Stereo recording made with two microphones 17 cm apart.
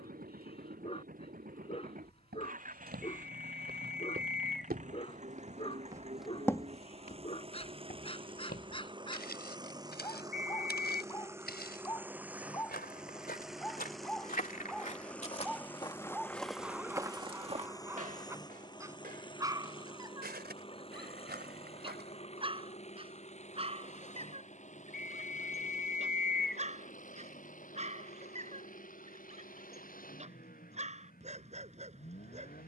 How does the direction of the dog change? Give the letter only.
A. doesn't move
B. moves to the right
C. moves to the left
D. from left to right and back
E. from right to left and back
B.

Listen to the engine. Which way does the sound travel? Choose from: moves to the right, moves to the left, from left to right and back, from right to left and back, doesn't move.
moves to the left.